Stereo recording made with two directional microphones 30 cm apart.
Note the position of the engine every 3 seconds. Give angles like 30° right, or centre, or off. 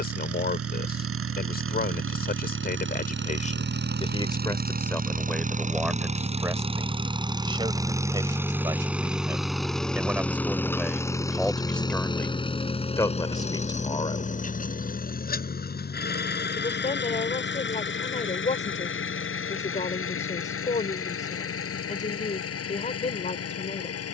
50° right, 30° right, 10° right, 10° left, 20° left, 30° left, 40° left, 50° left.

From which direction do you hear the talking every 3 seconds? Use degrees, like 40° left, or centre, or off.
30° left, 10° left, 10° right, centre, 10° left, 20° left, 20° left, 20° left.